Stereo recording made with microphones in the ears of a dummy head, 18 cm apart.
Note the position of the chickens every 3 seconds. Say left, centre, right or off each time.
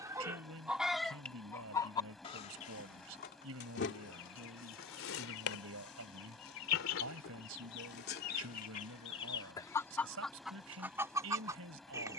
centre, left, left, centre.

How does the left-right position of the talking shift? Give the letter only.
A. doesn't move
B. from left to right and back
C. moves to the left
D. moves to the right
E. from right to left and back
A.